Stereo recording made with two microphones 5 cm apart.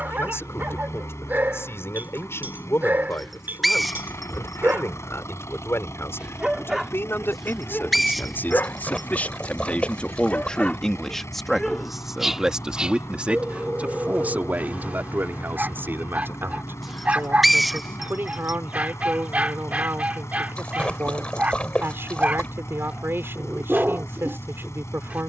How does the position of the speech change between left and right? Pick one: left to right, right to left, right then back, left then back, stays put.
left to right.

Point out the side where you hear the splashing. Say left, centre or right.
left.